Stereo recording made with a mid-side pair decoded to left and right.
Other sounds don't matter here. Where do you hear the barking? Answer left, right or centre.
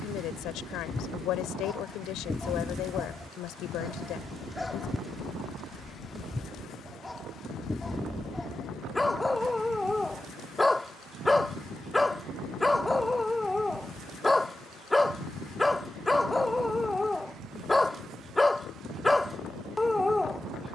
centre.